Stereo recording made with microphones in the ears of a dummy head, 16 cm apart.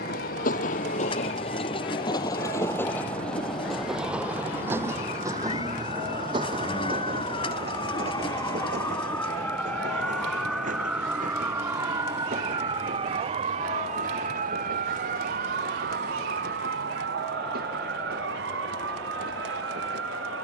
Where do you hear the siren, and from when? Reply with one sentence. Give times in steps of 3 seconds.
You can hear the siren on the left from 0 s, in the centre from 9 s and on the right from 12 s.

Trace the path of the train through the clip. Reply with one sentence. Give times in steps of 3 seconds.
You can hear the train on the left from 0 s, in the centre from 3 s and on the right from 6 s.